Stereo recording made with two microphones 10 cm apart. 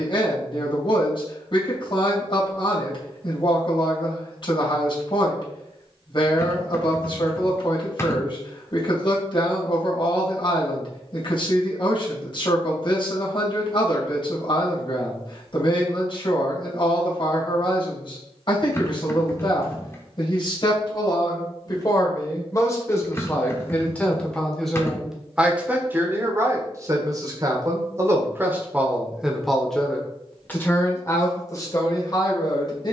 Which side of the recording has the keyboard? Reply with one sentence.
You can hear the keyboard on the left.